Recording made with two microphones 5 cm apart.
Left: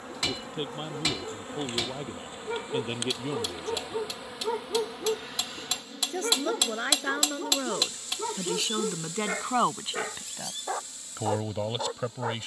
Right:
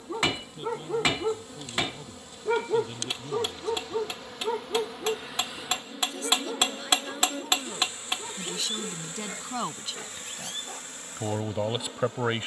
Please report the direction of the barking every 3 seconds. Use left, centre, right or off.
right, centre, left, left.